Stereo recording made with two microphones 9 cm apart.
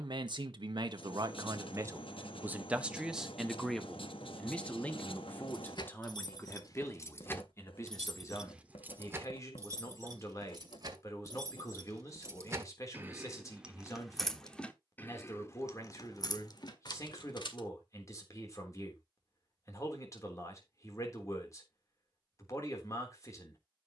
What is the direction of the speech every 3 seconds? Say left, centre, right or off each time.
right, centre, left, left, left, left, left, left.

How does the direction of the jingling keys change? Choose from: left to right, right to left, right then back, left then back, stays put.
right then back.